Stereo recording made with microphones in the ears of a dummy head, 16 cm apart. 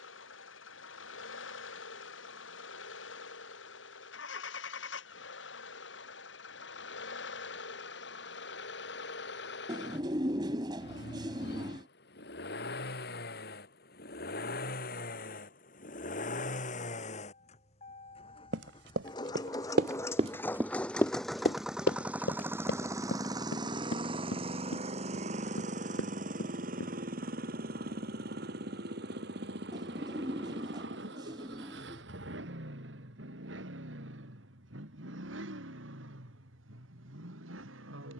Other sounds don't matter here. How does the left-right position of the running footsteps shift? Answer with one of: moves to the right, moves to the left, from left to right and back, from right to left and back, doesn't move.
moves to the left.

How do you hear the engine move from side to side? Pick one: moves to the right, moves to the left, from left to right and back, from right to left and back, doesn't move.
moves to the right.